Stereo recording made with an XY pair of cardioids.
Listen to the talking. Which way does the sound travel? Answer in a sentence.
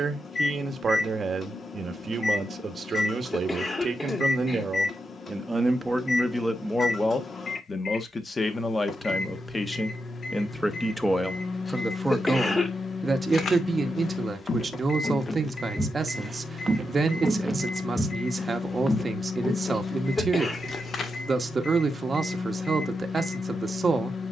In this clip you hear the talking move from right to left and back again.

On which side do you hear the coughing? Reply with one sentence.
You can hear the coughing on the left.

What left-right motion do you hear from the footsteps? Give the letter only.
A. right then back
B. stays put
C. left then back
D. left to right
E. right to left
A.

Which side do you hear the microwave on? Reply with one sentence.
You can hear the microwave on the left.